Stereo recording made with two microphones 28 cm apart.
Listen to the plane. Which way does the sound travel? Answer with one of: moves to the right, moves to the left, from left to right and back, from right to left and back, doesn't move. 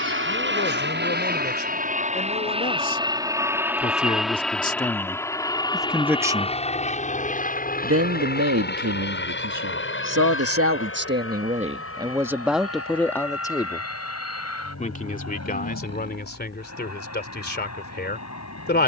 moves to the left.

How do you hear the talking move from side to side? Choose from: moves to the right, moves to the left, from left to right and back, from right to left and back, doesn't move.
from left to right and back.